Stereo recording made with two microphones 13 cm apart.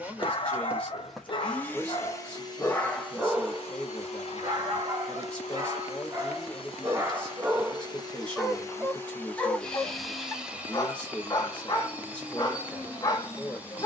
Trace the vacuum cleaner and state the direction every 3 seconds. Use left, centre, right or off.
centre, left, left, centre, centre.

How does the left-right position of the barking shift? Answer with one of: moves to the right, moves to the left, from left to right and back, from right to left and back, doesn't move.
from left to right and back.